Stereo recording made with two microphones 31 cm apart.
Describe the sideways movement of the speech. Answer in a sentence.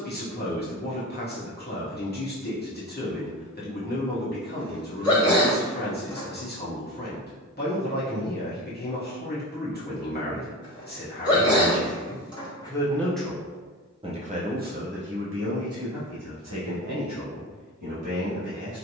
You can hear the speech move to the right.